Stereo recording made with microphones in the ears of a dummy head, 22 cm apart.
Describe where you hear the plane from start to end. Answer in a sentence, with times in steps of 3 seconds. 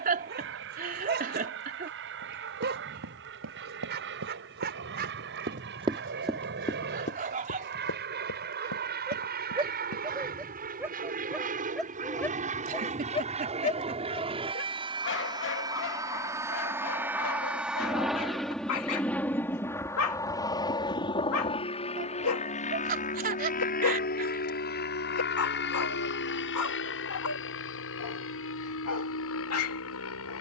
In this clip you hear the plane on the right from 0 s, in the centre from 15 s and on the left from 21 s.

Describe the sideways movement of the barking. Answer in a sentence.
You can hear the barking go from the right side to the left.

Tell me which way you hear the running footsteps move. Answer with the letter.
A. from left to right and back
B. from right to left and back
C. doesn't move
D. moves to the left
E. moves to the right
D.